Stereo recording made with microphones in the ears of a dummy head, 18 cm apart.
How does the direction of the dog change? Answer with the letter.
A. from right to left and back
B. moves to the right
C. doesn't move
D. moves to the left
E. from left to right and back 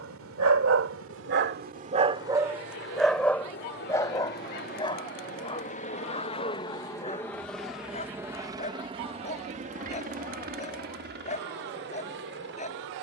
D.